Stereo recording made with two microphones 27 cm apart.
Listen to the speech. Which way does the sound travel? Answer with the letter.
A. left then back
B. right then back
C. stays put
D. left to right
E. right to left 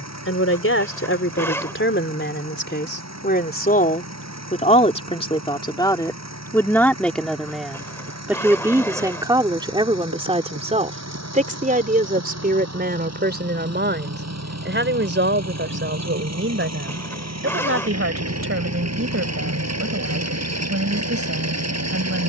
D.